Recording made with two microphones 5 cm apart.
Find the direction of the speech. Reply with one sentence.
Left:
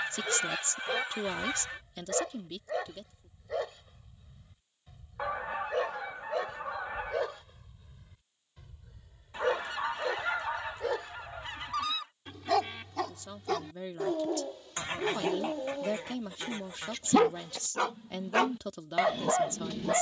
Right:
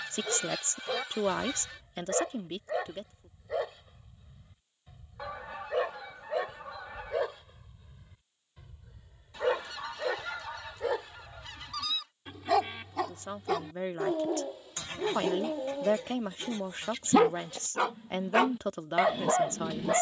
In this clip you hear the speech on the right.